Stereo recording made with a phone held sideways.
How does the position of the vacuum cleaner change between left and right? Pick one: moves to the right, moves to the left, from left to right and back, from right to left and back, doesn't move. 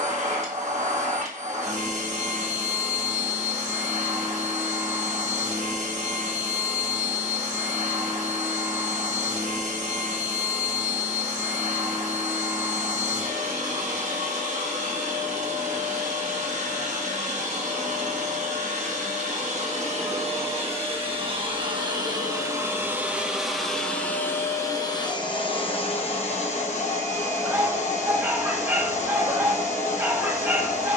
moves to the left.